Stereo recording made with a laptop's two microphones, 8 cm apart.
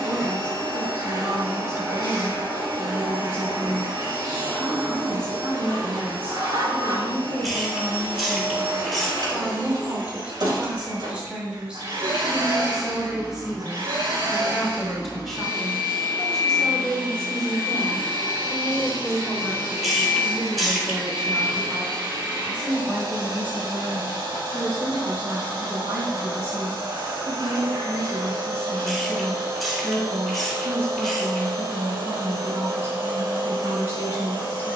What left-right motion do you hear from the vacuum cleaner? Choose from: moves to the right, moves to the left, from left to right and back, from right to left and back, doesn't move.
doesn't move.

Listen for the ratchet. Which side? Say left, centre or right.
centre.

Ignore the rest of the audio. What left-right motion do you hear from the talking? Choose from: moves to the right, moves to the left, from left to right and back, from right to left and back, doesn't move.
from right to left and back.